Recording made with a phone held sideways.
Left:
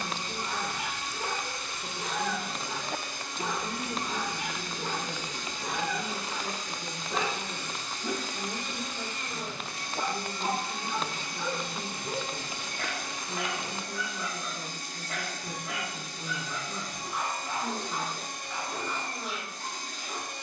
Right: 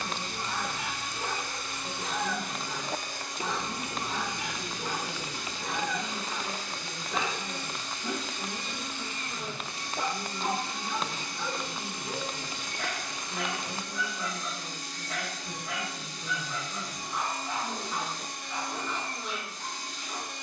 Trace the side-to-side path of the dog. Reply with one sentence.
In this clip you hear the dog stay put.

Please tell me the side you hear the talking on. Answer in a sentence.
In this clip you hear the talking on the left.